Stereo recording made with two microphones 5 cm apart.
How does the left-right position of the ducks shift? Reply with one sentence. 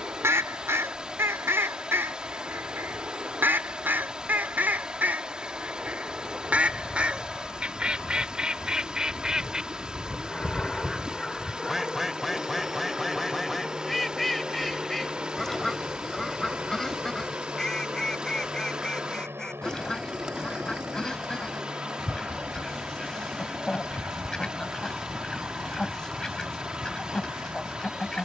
In this clip you hear the ducks go from the right side to the left.